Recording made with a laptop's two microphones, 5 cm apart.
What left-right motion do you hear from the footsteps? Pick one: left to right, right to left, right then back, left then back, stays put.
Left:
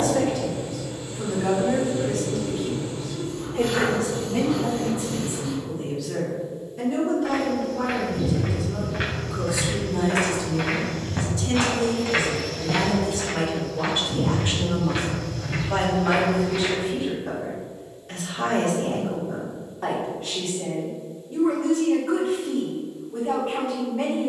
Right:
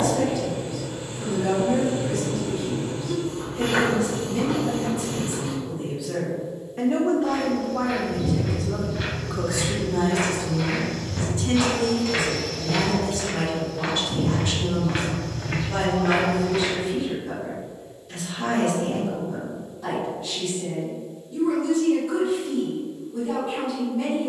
left to right.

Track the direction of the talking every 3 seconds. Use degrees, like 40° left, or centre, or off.
50° left, 30° left, 60° right, 40° right, 10° left, 40° left, 50° left, 50° left.